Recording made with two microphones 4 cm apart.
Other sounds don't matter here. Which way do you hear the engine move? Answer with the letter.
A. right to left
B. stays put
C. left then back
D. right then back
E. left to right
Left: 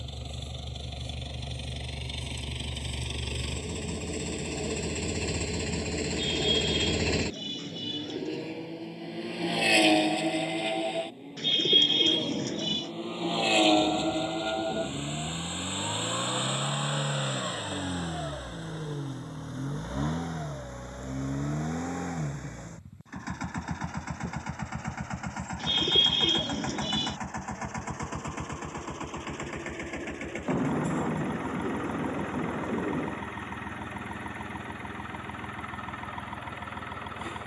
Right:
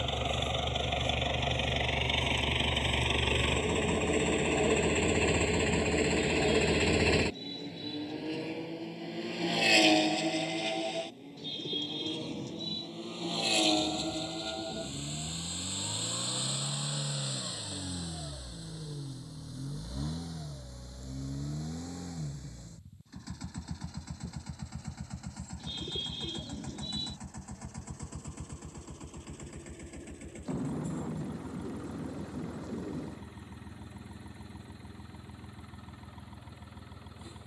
A.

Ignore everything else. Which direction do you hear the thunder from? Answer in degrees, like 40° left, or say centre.
40° left.